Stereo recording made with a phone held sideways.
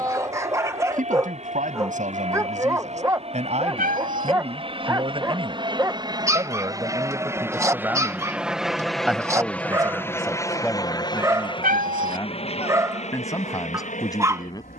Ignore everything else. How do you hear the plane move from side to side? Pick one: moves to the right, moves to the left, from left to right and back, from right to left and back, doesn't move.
moves to the left.